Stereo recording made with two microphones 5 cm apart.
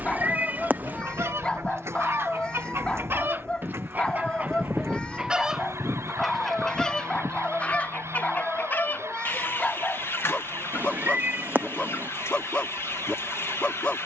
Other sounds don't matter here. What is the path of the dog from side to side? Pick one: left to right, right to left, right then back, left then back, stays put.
stays put.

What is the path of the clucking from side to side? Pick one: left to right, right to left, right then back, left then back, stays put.
right to left.